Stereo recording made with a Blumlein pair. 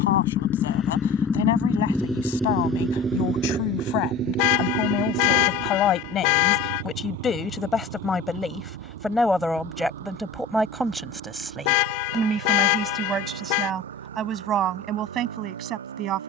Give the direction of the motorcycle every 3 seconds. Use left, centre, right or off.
centre, right, right, right, right, right.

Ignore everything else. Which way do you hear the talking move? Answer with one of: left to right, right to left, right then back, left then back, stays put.
left to right.